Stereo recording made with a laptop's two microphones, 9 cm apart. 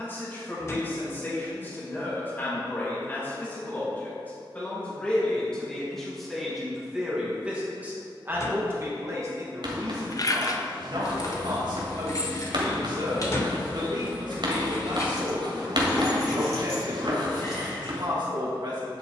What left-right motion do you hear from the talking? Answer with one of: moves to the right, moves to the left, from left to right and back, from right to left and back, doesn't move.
moves to the right.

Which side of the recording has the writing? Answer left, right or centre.
right.